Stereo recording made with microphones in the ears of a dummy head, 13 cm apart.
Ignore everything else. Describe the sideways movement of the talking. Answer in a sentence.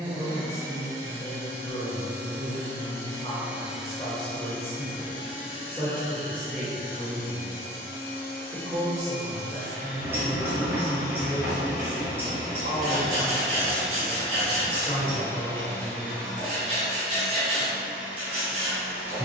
You can hear the talking go right and come back.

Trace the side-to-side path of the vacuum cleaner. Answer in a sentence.
In this clip you hear the vacuum cleaner go left and come back.